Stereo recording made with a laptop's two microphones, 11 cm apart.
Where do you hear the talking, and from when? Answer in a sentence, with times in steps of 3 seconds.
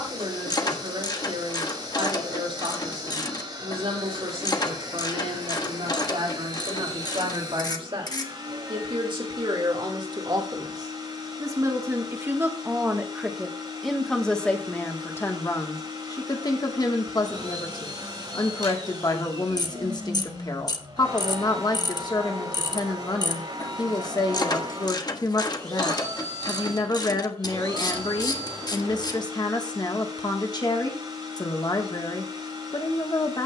You can hear the talking on the right from 0 s, in the centre from 12 s and on the left from 15 s.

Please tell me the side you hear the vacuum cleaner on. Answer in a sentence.
In this clip you hear the vacuum cleaner on the right.